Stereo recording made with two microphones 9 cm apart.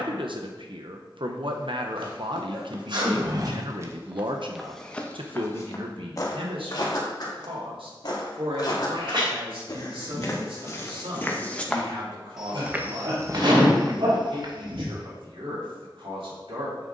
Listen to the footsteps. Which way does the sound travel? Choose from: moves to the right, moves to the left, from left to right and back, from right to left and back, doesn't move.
from right to left and back.